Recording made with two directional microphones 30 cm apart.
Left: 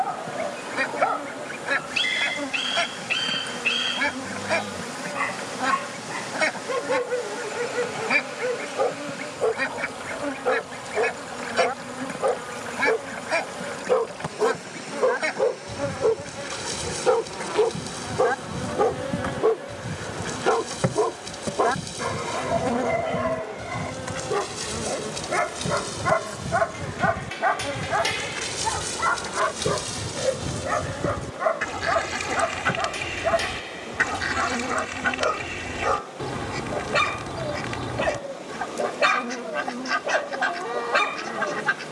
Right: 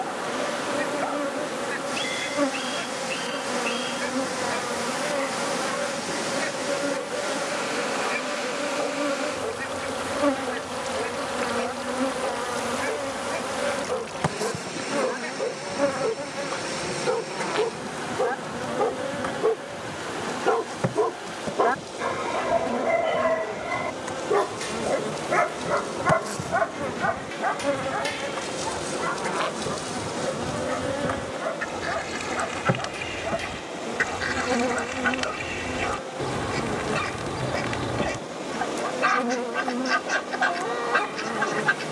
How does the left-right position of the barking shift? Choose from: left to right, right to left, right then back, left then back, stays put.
right then back.